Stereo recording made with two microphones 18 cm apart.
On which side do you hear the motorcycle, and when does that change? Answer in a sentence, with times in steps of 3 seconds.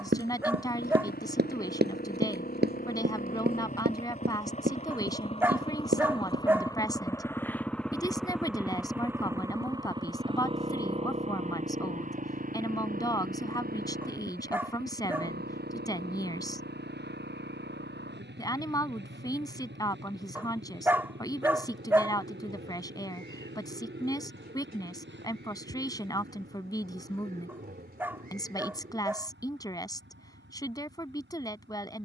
You can hear the motorcycle on the left from 0 s, in the centre from 6 s and on the right from 9 s.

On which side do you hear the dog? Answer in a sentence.
In this clip you hear the dog in the centre.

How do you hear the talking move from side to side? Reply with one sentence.
You can hear the talking stay put.